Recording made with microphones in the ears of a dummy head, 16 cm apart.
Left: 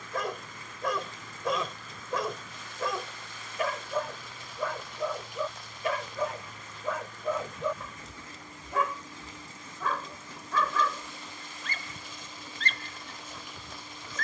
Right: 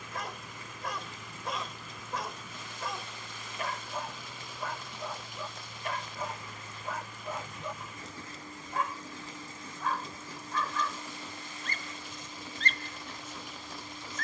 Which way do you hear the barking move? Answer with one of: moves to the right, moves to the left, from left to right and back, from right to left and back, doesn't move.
doesn't move.